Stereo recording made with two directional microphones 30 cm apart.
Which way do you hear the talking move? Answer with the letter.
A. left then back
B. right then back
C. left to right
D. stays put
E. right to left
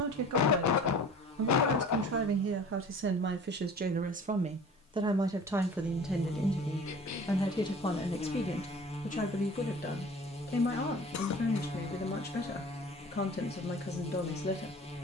E.